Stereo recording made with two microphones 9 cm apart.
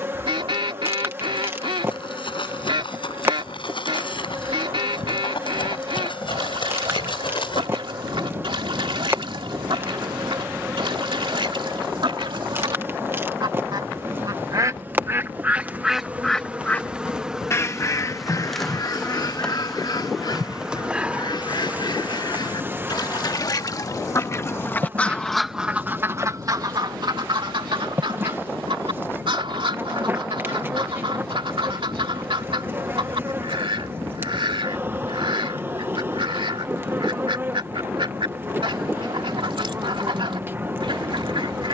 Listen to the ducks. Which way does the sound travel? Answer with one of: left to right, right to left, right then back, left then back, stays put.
left then back.